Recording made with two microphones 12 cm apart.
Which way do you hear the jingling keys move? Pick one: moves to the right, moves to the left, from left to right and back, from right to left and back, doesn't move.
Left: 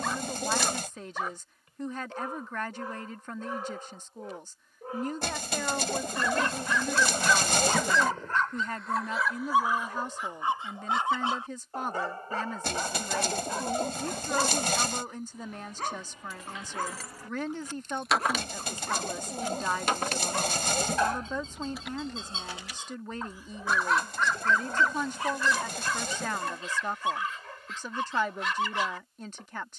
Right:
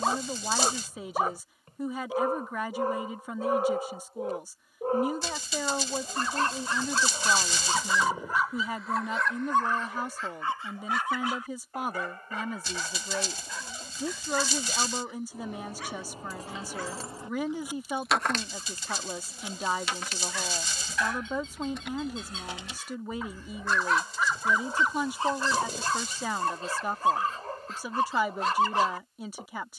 from right to left and back.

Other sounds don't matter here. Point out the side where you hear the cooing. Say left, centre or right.
left.